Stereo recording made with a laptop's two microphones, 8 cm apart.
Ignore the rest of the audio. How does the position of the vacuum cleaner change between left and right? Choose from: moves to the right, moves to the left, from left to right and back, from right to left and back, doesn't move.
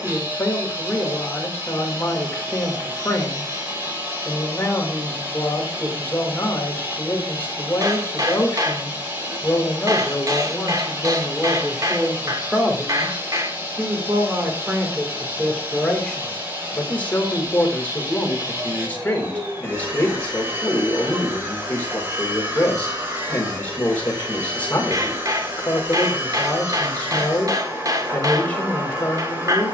doesn't move.